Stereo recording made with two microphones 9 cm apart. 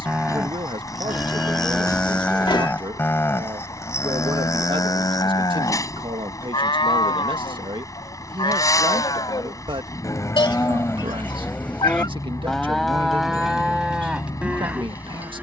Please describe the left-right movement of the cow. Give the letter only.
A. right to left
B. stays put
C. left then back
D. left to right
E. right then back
C.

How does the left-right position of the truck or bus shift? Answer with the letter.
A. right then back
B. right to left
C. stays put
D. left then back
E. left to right
C.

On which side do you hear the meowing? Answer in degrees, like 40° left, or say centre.
60° left.